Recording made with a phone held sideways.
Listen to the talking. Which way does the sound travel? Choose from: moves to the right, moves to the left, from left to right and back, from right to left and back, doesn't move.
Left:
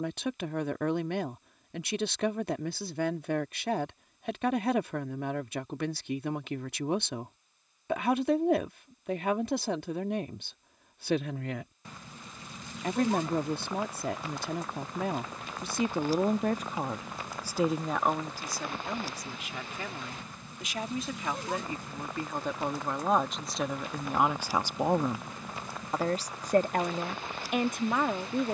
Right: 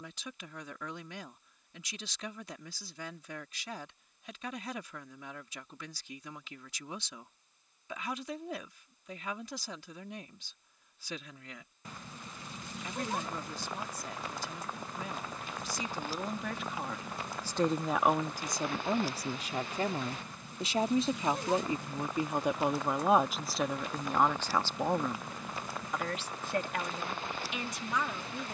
from left to right and back.